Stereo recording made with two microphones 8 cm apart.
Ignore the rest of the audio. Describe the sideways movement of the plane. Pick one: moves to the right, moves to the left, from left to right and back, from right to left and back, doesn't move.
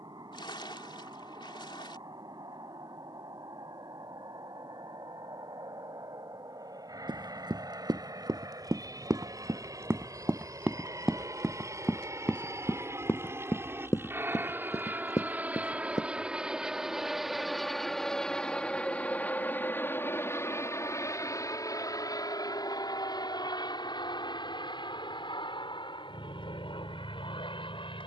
moves to the left.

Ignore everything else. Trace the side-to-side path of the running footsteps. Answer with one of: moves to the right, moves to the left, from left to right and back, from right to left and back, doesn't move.
moves to the left.